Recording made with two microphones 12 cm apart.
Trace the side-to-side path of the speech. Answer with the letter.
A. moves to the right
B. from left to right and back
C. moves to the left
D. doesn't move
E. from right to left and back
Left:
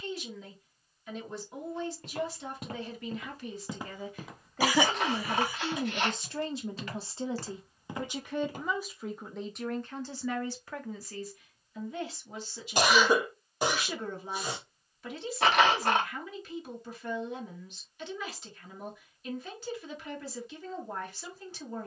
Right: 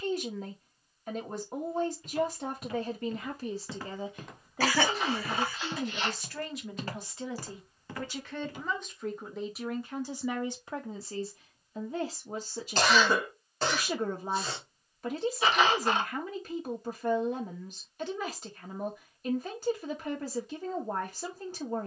E.